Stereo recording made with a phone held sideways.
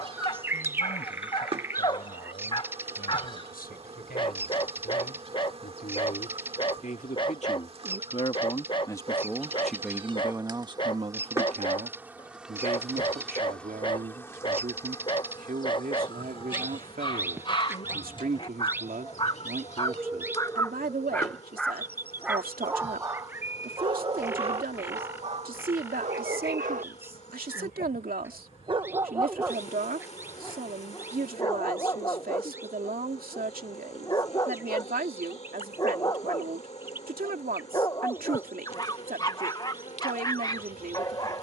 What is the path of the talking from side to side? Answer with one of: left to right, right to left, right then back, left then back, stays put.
left to right.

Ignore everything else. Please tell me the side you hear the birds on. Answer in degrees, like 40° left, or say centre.
10° right.